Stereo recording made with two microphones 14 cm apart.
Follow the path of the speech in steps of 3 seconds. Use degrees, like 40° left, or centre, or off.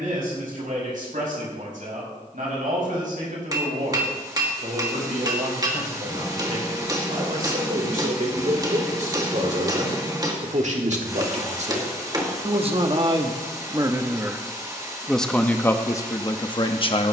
80° right, 70° right, 70° right, 60° right, 30° right, 20° left.